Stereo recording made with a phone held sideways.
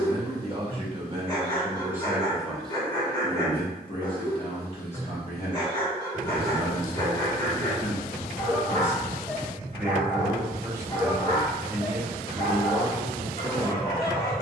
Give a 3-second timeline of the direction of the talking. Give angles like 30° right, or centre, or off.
20° right, 30° left, 40° left, 20° right, 20° right.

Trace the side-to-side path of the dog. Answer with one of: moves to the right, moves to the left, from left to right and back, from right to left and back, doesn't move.
doesn't move.